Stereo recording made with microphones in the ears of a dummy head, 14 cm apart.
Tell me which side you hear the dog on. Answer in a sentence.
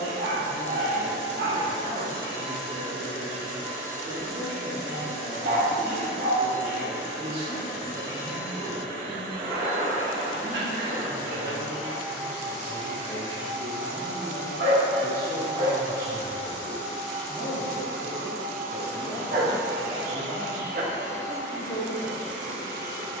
You can hear the dog on the right.